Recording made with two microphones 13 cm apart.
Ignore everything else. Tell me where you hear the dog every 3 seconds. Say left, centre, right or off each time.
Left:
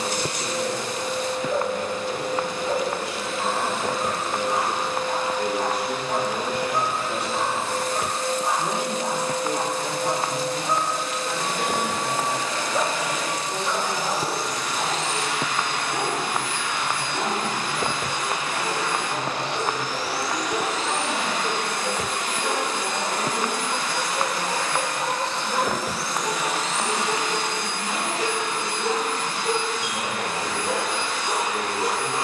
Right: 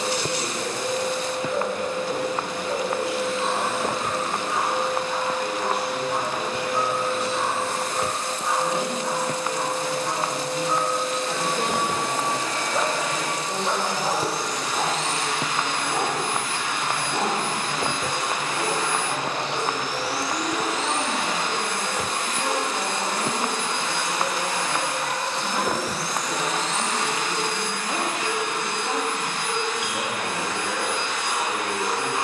left, left, left, left, right, right, centre, left, left, left, left.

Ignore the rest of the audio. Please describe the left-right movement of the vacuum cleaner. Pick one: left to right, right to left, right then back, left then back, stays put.
right to left.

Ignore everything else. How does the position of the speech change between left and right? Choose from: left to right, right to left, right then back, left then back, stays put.
left then back.